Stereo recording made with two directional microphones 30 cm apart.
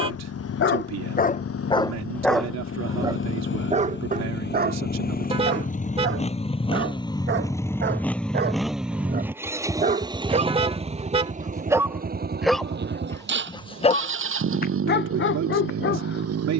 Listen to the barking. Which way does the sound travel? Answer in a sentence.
You can hear the barking go right and come back.